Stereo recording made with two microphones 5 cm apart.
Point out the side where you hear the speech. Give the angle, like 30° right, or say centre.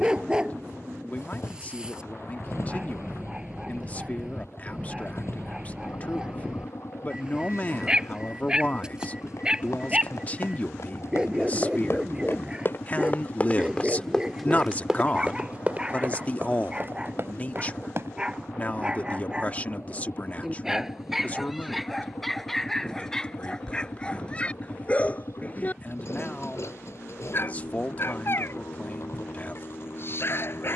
30° left.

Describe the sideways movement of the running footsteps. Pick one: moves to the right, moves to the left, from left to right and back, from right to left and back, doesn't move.
moves to the right.